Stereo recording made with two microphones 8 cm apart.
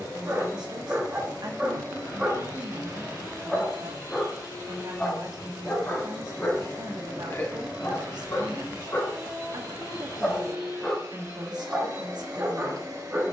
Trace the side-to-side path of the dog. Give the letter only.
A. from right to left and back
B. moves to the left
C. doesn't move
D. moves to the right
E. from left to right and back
A.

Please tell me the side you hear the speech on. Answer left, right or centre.
right.